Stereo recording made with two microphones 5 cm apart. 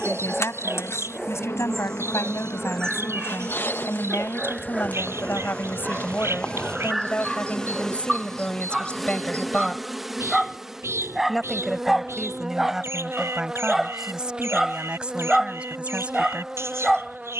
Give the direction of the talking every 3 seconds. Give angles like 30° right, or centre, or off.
70° left, 50° left, 30° left, 10° left, 10° right, 20° right.